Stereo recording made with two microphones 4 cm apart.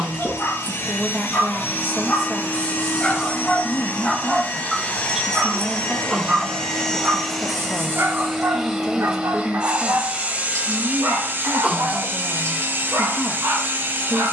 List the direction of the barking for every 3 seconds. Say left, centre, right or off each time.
left, centre, right, right, right.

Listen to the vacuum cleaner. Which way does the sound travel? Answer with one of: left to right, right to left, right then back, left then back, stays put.
left to right.